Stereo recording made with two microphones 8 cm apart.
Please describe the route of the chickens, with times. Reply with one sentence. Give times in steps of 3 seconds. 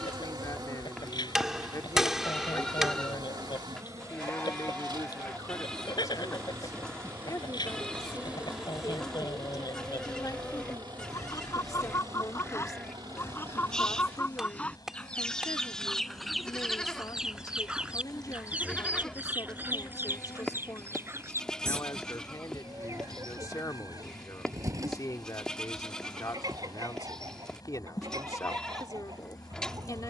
You can hear the chickens on the left from 0 s, in the centre from 15 s and on the right from 18 s.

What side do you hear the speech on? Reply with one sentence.
You can hear the speech on the left.